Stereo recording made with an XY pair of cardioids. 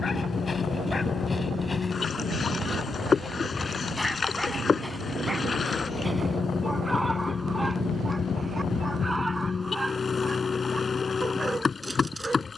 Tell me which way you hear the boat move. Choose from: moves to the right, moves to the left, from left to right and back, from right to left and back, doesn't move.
doesn't move.